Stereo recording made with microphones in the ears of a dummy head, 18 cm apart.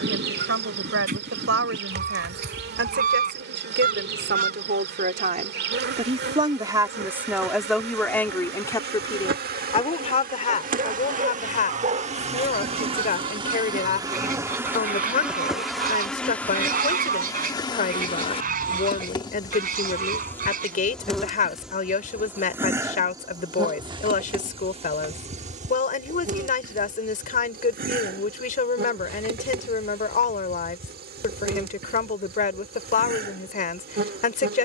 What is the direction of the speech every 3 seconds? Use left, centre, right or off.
right, right, centre, left, left, left, left, left, left, left, left, left.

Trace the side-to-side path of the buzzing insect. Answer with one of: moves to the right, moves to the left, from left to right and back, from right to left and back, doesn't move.
from right to left and back.